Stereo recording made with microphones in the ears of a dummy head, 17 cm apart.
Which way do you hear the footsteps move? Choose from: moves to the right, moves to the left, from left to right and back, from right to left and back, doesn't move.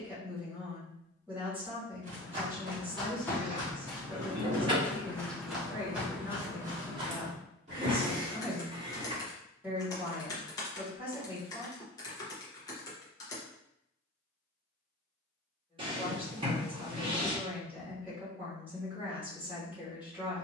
from right to left and back.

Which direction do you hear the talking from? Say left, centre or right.
centre.